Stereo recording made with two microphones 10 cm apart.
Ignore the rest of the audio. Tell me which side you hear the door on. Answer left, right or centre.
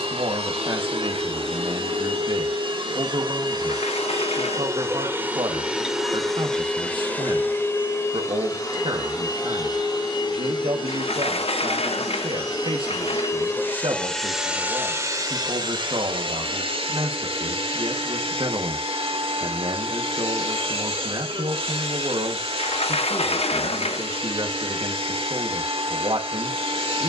left.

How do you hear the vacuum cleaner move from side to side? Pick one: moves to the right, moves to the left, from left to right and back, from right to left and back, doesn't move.
from right to left and back.